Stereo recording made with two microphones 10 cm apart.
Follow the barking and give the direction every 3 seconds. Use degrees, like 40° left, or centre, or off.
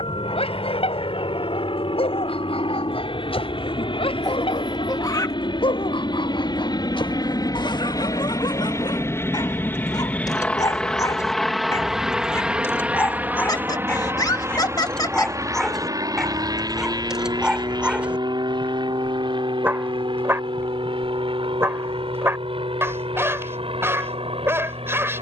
70° left, 70° left, 50° left, 40° left, 20° left, centre, 20° right, 20° right, 20° right.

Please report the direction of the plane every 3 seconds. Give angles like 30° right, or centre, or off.
70° left, 60° left, 40° left, 10° left, 20° right, 40° right, 50° right, 50° right, 60° right.